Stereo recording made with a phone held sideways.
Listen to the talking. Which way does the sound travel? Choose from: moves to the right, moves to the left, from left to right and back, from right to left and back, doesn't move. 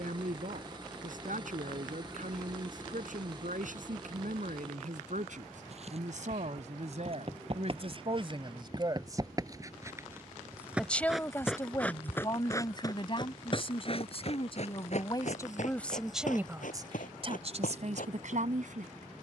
from right to left and back.